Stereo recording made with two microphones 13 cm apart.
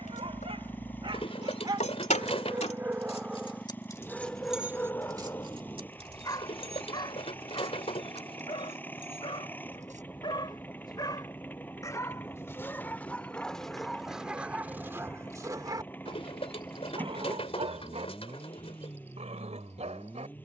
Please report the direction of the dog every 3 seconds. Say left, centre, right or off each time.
right, centre, left, left, centre, right, right.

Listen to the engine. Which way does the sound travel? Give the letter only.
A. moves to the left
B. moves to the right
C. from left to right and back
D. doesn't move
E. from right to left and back
D.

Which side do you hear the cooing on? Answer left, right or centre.
left.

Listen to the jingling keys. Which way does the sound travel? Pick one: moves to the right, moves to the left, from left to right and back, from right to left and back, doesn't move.
moves to the right.